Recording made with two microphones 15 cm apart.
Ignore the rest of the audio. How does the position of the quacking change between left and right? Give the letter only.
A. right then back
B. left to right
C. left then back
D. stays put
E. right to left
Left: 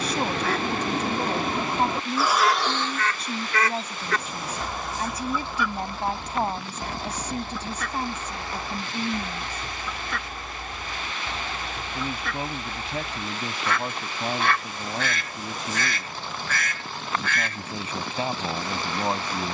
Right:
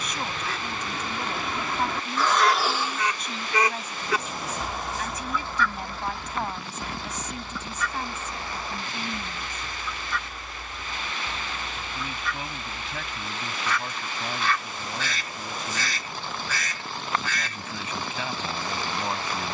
A.